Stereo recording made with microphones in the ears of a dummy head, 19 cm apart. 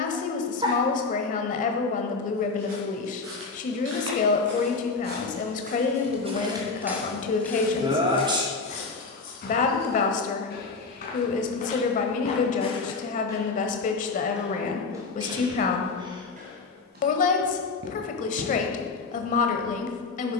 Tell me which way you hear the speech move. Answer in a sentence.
You can hear the speech stay in one place.